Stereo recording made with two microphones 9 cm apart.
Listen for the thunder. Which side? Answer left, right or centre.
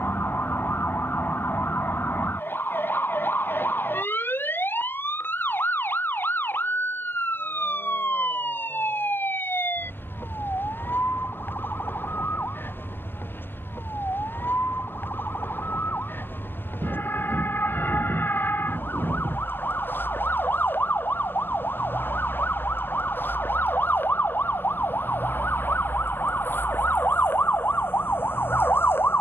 right.